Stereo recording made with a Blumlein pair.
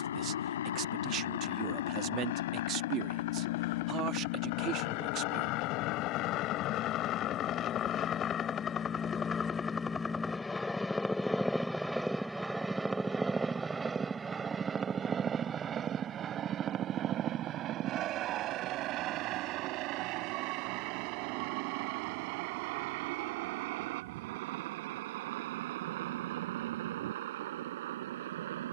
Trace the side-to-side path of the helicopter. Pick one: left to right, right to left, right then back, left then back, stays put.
left to right.